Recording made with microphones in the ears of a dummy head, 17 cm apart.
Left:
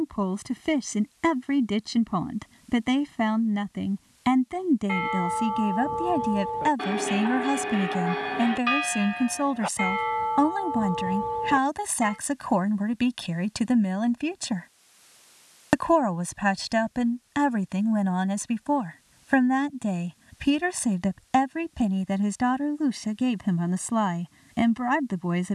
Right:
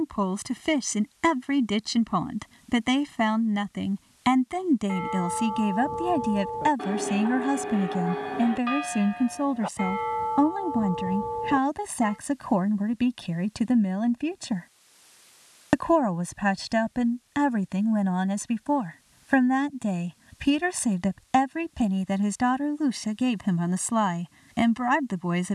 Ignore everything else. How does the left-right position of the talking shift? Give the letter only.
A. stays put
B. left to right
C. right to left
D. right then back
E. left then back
E.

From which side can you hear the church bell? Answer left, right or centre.
left.